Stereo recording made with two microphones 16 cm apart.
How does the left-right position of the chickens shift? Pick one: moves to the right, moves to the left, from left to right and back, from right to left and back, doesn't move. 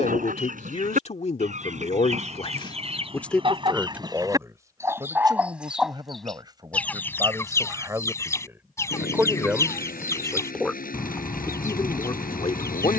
moves to the left.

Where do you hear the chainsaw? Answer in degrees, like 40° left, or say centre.
60° left.